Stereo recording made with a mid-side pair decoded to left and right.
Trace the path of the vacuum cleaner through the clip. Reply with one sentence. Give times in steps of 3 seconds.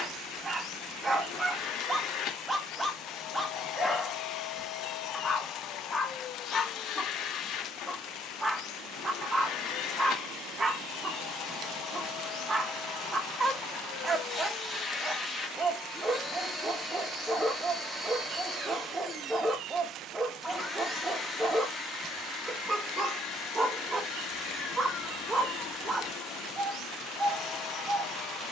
In this clip you hear the vacuum cleaner on the left from 0 s, in the centre from 15 s and on the left from 21 s.